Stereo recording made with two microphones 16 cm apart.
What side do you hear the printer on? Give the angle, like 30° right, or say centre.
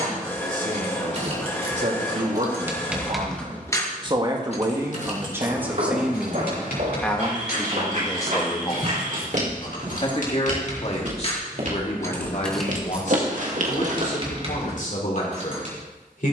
20° left.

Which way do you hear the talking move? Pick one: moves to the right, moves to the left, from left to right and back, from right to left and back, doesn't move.
moves to the left.